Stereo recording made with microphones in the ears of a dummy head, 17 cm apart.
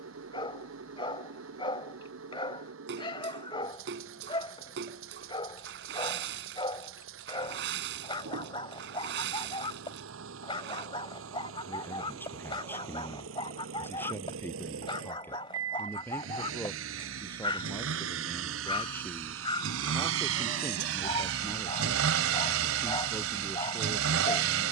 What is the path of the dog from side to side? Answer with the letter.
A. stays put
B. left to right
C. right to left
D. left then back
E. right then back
A.